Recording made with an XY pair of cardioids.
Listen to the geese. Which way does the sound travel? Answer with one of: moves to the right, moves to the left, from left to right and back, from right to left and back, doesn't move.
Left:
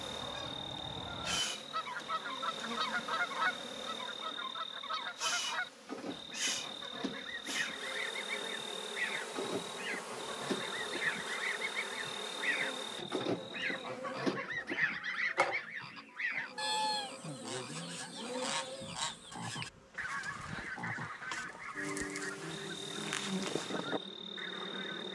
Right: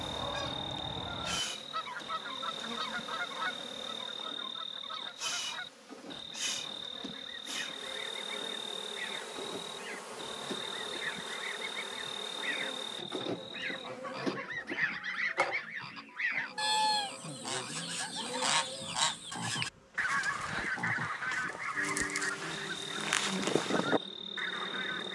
from right to left and back.